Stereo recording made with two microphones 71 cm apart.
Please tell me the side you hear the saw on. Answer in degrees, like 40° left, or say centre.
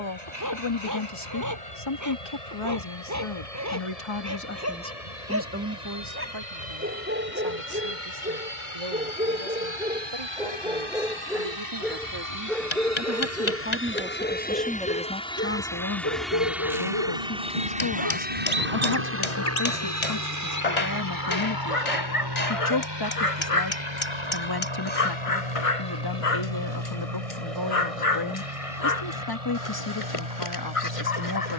70° right.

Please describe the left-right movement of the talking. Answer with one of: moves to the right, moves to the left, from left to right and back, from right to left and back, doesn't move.
from left to right and back.